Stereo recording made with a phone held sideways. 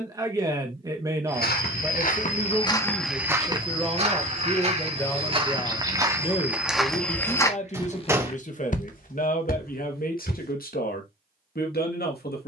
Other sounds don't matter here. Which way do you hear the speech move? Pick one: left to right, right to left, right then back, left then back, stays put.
right to left.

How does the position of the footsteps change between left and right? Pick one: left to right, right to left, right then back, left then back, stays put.
right then back.